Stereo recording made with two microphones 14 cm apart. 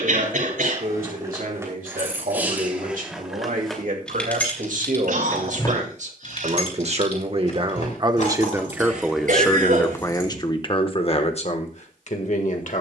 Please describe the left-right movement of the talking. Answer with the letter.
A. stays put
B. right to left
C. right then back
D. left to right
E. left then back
B.